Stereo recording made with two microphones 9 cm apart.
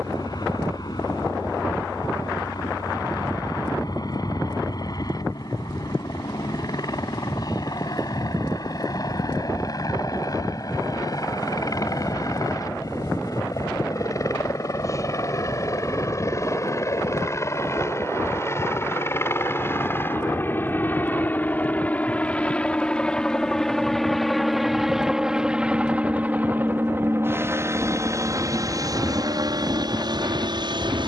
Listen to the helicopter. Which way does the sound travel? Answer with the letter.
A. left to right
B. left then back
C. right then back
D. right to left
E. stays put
A.